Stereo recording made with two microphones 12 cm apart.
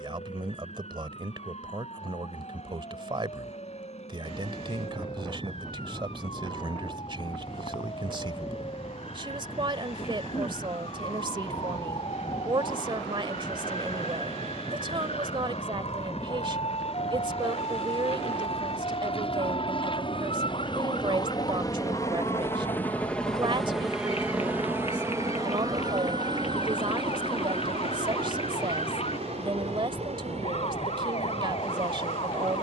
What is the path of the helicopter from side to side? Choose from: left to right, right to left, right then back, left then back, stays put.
left to right.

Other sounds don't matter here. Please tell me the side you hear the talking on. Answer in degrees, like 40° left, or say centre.
50° right.